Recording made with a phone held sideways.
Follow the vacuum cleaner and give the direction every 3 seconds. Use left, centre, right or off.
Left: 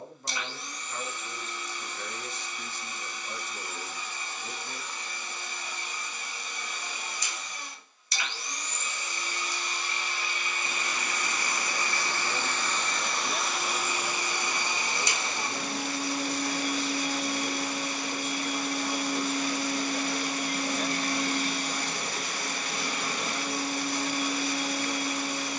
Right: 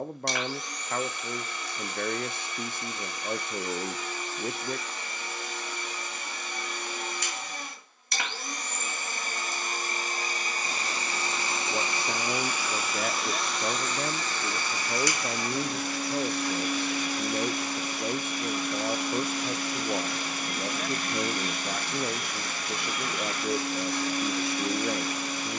right, right, right, right, centre, left, left, left, left.